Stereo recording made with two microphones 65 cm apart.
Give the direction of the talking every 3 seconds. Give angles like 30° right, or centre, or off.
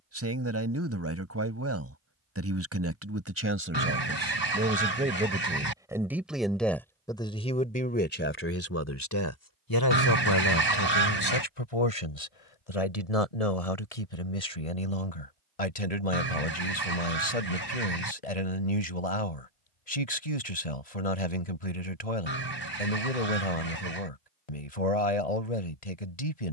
20° right, 10° right, 10° left, 40° left, 70° left, 70° left, 70° left, 70° left, 70° left.